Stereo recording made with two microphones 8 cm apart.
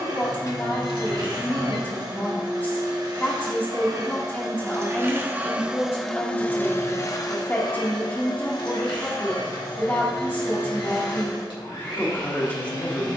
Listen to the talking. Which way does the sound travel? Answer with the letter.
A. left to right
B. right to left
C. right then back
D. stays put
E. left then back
D.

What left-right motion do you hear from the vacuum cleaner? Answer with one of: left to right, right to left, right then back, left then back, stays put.
right to left.